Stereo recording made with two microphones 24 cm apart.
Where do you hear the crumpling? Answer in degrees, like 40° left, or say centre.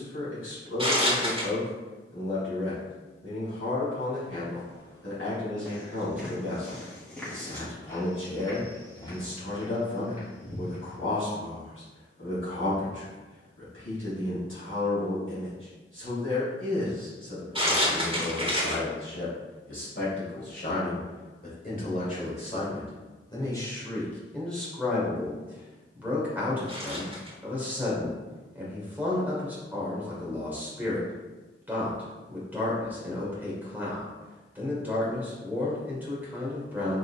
20° right.